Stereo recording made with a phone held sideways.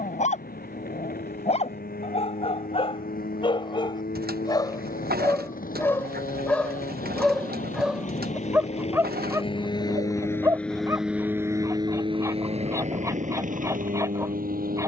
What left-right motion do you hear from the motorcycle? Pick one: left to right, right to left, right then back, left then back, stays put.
left to right.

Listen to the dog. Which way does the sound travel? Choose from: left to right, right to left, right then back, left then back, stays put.
left to right.